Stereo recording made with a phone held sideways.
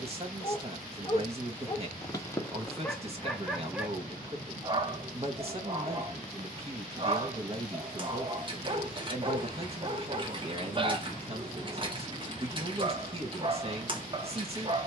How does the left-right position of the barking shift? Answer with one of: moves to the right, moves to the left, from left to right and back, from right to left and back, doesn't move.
moves to the right.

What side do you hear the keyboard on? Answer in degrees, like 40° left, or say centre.
30° right.